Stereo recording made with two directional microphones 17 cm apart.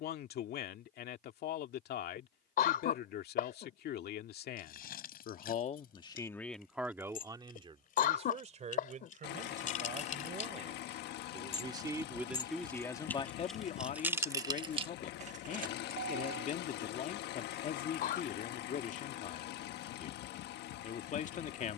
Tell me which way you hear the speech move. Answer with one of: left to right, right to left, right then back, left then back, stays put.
right then back.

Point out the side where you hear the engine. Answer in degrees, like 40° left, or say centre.
70° left.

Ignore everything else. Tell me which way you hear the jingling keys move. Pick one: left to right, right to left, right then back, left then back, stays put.
left to right.